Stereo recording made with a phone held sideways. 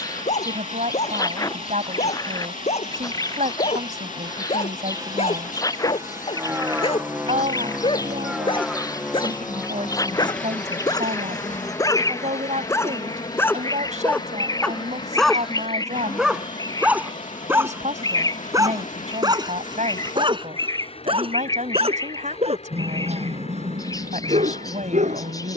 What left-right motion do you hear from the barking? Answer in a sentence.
In this clip you hear the barking travel towards the right.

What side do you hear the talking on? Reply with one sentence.
In this clip you hear the talking on the right.